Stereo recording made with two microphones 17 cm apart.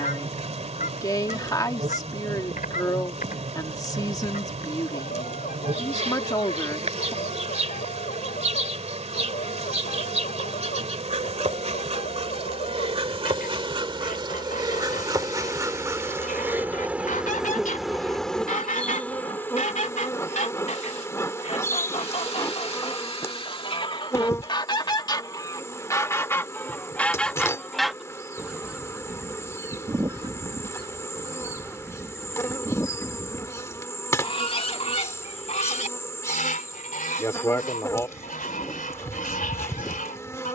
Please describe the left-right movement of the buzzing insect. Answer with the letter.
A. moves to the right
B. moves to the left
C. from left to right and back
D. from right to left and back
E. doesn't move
B.